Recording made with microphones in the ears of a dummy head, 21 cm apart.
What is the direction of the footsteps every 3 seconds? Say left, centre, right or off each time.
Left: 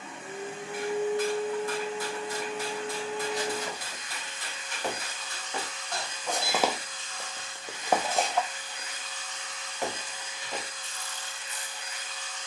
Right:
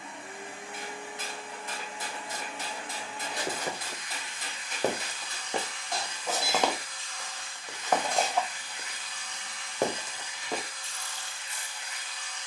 off, right, centre, right.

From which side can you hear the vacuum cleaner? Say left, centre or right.
left.